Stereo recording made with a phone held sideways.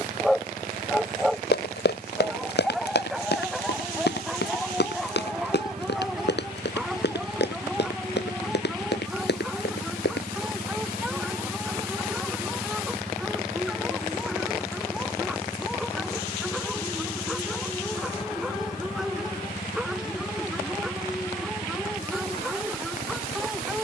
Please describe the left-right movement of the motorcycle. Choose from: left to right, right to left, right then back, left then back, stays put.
right to left.